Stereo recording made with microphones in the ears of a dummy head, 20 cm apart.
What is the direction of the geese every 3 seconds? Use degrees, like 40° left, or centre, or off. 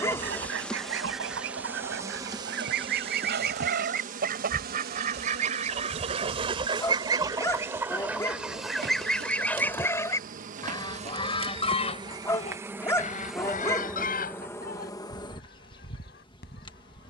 60° right, 40° right, 10° right, 20° left, 40° left, 50° left.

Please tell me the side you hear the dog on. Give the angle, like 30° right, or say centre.
10° left.